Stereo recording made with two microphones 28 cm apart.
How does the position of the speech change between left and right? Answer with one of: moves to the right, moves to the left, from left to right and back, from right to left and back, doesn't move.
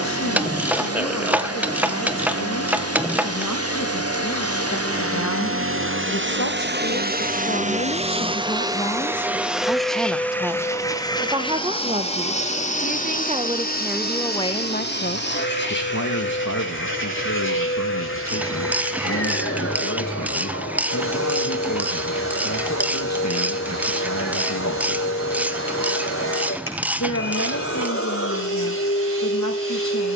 from left to right and back.